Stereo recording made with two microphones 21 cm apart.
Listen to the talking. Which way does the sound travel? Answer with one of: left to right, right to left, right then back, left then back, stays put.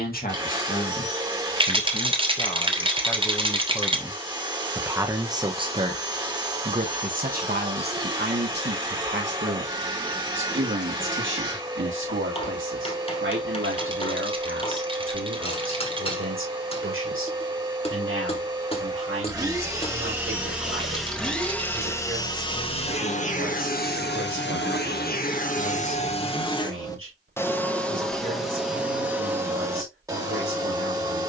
left to right.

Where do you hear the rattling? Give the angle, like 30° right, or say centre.
20° right.